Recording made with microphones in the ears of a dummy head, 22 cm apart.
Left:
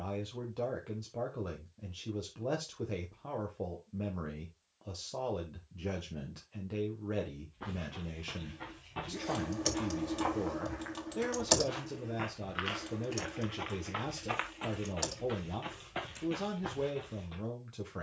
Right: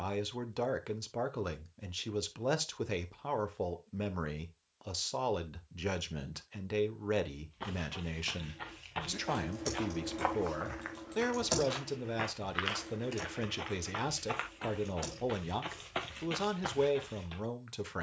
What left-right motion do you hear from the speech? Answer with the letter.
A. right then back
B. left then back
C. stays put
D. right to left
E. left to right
C.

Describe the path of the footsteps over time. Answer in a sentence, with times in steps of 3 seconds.
In this clip you hear the footsteps not at all from 0 s, on the right from 6 s, in the centre from 12 s and on the right from 15 s.